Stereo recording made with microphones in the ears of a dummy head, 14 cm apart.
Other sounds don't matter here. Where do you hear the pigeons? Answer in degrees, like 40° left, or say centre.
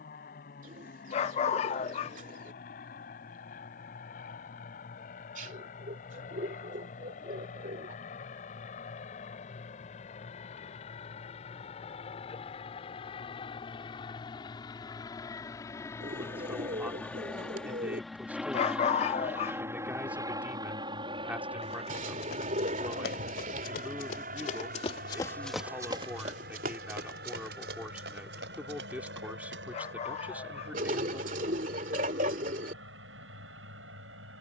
50° right.